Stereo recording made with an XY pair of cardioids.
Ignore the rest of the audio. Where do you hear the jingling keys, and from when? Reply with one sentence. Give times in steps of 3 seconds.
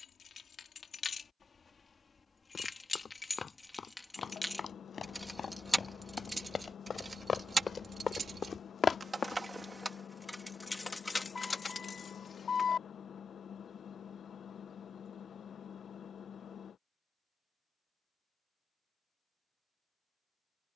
You can hear the jingling keys on the left from 0 s, in the centre from 3 s, on the right from 6 s, in the centre from 9 s, on the left from 12 s and not at all from 15 s.